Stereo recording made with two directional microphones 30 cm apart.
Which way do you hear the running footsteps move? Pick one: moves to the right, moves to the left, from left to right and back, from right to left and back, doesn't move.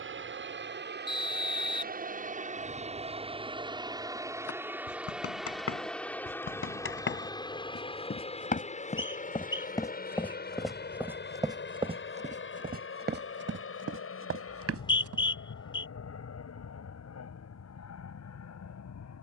moves to the right.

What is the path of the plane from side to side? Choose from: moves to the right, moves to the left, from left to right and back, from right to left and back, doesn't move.
moves to the left.